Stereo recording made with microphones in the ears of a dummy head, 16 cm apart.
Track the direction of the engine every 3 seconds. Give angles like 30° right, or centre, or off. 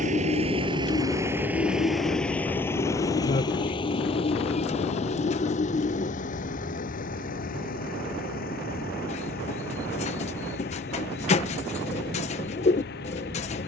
10° right, 30° left, 50° left, 50° left, 60° left.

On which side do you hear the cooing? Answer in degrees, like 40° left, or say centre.
30° left.